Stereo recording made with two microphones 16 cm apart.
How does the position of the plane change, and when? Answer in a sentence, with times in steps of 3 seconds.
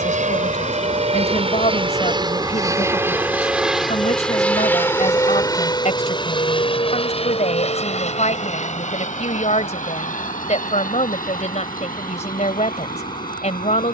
In this clip you hear the plane on the right from 0 s, in the centre from 3 s and on the left from 6 s.